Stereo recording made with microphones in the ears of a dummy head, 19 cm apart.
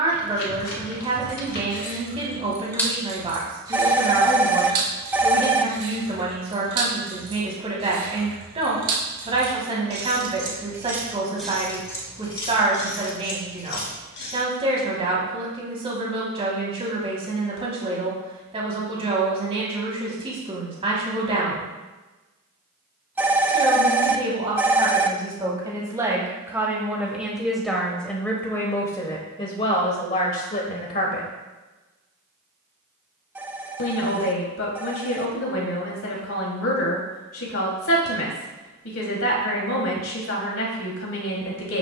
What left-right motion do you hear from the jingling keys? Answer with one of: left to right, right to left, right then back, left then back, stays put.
right then back.